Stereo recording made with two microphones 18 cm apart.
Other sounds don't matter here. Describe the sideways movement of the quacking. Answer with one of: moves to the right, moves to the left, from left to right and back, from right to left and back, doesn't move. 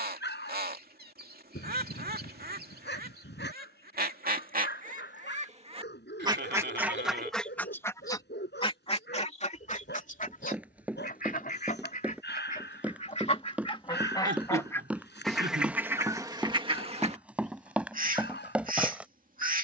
from right to left and back.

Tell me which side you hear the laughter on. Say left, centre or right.
right.